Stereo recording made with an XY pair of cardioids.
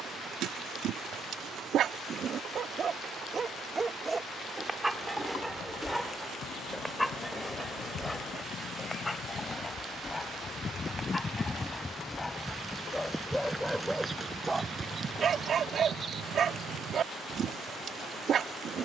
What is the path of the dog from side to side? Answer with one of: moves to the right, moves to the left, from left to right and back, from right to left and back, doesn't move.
from right to left and back.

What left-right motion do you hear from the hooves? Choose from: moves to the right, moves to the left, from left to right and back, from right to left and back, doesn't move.
moves to the right.